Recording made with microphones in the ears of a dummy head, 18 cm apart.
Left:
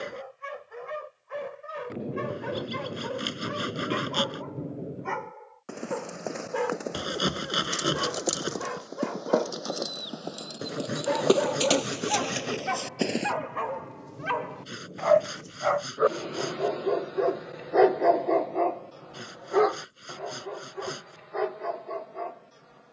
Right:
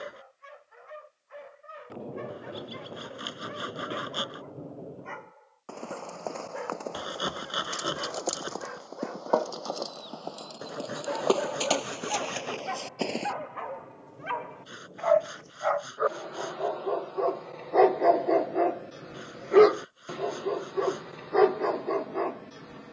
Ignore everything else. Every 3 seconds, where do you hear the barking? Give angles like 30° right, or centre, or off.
70° left, 70° left, 70° left, 70° left, 60° left, 30° left, 30° right, 60° right.